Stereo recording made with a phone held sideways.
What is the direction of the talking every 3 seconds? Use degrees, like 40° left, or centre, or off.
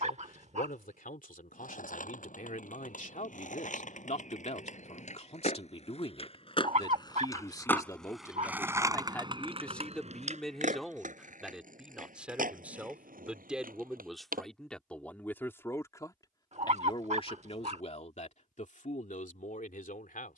70° left, 50° left, 30° left, centre, centre, 30° left, 60° left.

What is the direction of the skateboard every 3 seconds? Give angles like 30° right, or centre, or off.
70° left, 60° left, 10° left, 50° right, 70° right, off, off.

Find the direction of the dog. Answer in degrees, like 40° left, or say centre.
50° right.